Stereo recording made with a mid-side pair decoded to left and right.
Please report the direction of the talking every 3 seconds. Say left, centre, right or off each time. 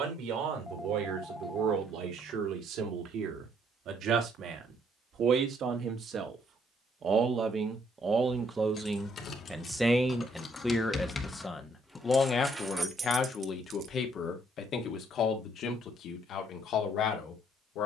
right, right, right, centre, left, left.